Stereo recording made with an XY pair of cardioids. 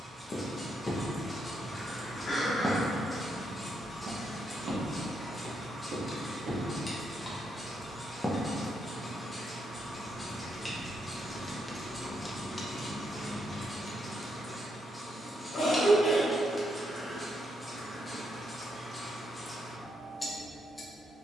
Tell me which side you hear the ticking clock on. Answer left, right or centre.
centre.